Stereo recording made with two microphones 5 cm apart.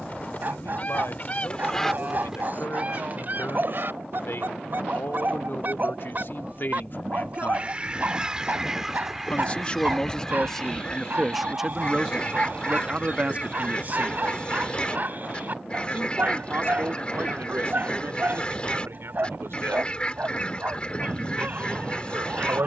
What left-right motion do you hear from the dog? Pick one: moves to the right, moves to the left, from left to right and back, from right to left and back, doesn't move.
doesn't move.